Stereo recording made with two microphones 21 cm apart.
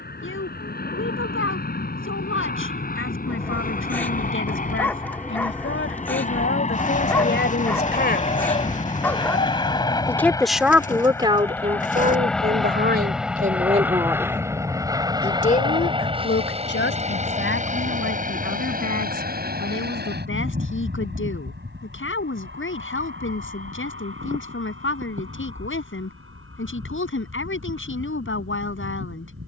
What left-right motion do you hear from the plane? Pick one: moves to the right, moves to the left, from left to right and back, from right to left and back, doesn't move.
moves to the right.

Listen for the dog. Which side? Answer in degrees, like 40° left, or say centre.
10° left.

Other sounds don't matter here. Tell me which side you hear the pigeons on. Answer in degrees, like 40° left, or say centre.
40° left.